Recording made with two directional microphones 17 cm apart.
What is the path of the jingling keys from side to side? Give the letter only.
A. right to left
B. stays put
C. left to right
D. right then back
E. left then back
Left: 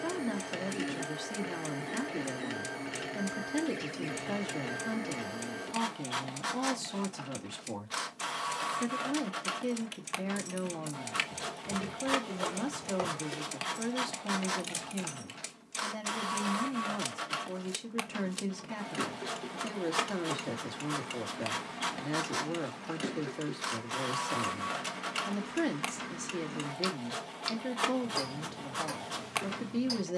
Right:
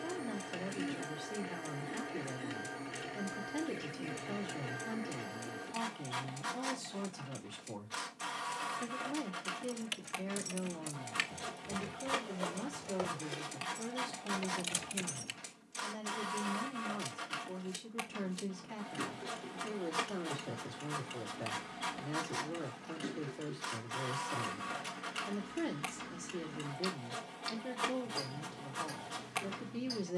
E.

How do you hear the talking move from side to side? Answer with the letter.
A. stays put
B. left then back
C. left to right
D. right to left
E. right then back
A.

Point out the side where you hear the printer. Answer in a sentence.
You can hear the printer on the left.